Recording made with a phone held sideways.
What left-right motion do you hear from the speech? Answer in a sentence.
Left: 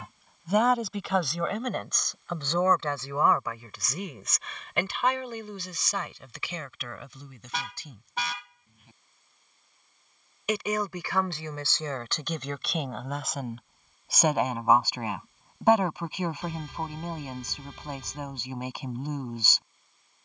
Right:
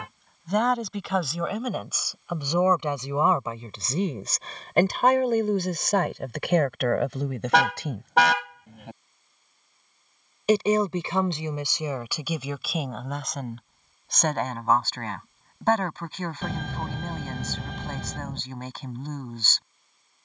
In this clip you hear the speech move from left to right and back again.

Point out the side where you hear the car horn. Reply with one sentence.
In this clip you hear the car horn on the right.